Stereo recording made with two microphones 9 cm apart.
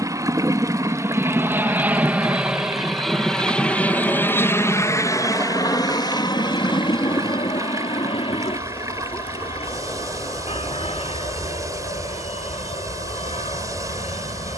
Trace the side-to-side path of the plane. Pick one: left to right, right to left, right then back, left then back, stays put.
right to left.